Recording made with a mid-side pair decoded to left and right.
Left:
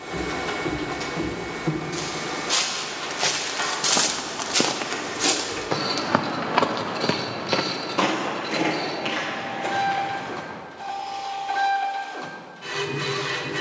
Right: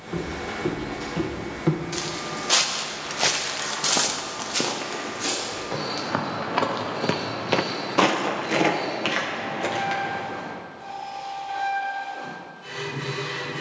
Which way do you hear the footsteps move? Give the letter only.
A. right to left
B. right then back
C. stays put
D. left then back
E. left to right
D.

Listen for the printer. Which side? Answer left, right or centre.
left.